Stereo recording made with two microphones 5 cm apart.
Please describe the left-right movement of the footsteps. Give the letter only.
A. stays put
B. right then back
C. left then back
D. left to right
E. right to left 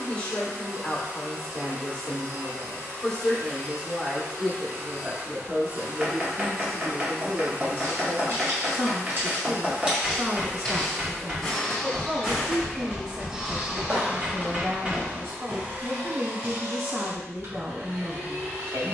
C.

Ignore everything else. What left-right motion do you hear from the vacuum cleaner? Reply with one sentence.
In this clip you hear the vacuum cleaner go left and come back.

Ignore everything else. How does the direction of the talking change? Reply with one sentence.
You can hear the talking travel towards the right.